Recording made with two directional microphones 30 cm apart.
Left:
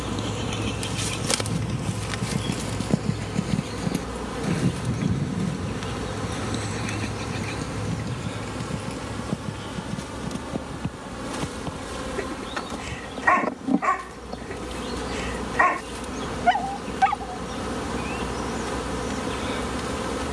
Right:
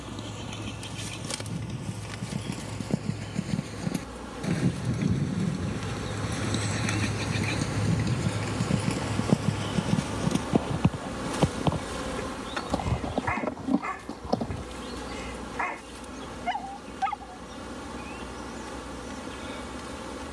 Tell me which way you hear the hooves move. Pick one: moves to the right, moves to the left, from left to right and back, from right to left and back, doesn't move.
moves to the right.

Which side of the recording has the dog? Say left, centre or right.
left.